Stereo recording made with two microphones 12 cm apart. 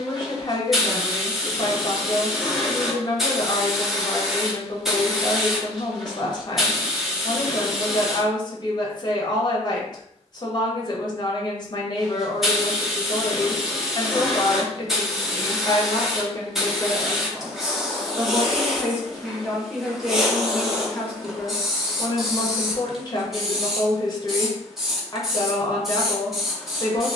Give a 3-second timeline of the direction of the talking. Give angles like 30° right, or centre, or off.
40° left, 40° left, 40° left, 40° left, 40° left, 20° left, centre, 30° left, 30° left.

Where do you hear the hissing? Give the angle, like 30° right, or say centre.
centre.